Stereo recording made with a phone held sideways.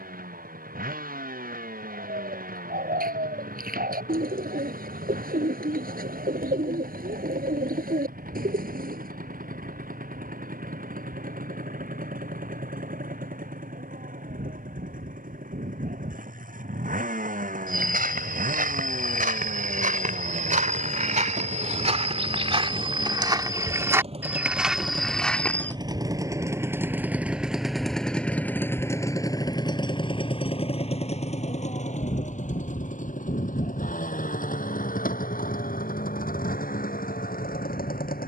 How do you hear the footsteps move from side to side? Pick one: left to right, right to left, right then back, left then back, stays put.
right to left.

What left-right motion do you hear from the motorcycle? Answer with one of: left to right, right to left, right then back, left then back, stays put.
right to left.